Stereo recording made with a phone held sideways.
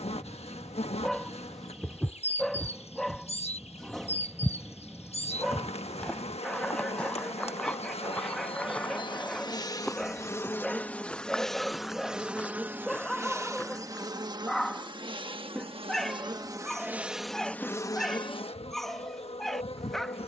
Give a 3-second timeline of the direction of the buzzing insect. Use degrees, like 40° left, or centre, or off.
40° left, 40° left, 40° left, 10° left, 20° right, 20° right, 40° left.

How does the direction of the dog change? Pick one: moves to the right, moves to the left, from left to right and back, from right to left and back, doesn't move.
doesn't move.